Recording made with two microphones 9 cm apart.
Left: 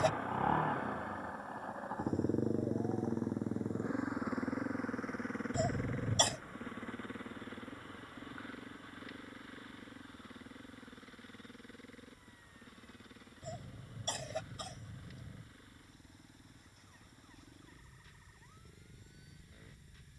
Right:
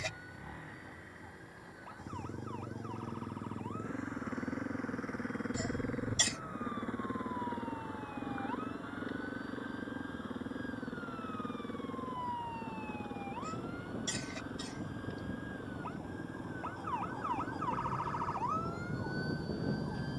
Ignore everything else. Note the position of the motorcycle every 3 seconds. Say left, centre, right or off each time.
left, centre, right, right, right, right, right.